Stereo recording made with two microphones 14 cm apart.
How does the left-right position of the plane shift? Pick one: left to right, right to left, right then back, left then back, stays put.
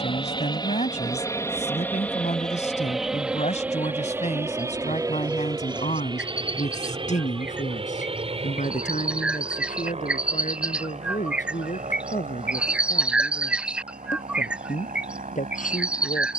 left to right.